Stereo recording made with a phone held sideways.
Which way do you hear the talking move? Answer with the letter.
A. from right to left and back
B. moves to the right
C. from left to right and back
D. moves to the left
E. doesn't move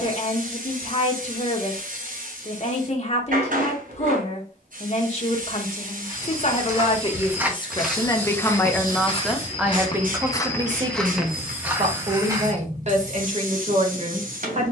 B.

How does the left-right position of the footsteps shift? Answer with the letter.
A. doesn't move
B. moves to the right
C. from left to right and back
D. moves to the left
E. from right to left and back
E.